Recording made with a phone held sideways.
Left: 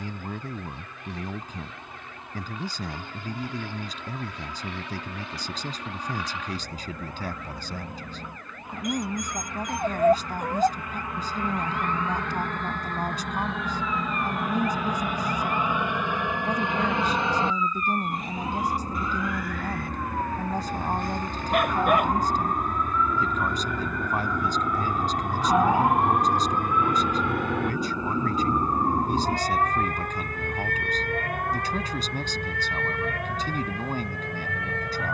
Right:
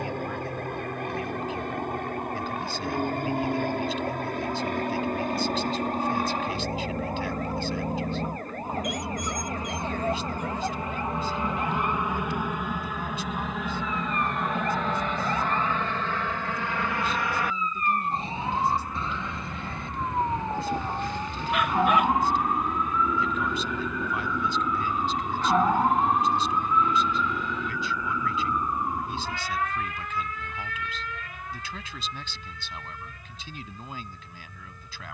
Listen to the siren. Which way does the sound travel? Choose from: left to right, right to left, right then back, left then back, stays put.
right to left.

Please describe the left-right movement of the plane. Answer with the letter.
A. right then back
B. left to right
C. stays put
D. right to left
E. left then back
D.